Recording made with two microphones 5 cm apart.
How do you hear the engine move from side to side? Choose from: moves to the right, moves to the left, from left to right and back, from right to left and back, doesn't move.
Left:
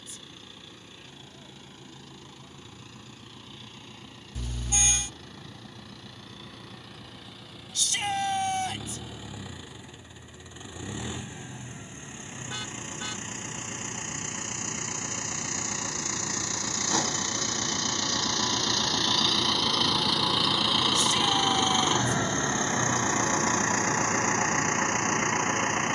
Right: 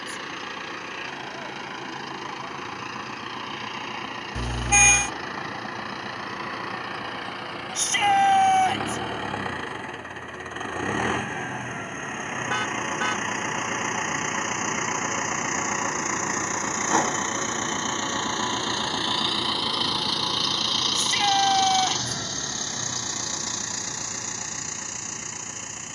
moves to the left.